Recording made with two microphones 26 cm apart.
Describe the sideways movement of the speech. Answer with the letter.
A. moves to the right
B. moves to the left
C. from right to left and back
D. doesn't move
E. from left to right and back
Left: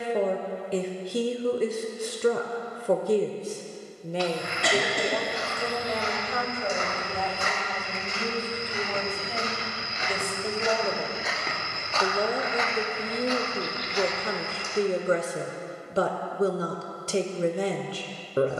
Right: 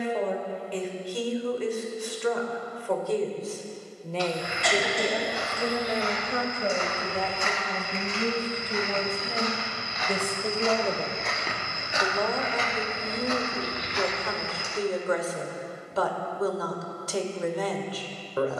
E.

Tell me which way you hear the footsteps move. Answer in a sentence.
You can hear the footsteps travel towards the right.